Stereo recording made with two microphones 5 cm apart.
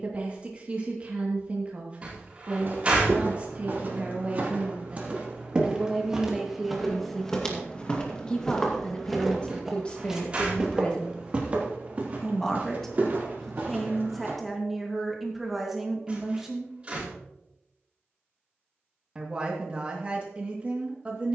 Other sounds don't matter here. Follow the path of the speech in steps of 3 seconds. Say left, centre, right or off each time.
right, right, centre, left, centre, centre, right.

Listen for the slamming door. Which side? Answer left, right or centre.
right.